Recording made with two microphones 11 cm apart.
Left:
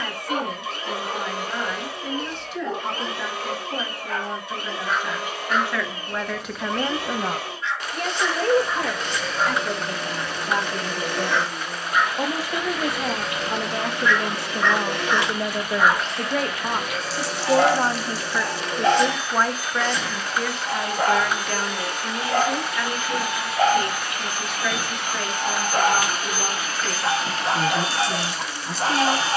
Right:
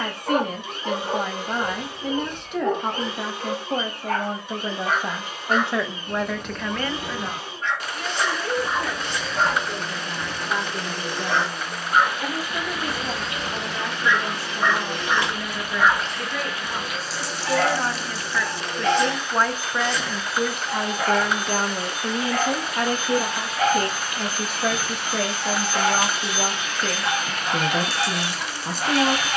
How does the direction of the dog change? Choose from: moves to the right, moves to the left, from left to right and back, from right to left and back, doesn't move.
moves to the left.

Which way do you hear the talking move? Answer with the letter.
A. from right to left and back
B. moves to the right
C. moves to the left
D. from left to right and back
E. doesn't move
A.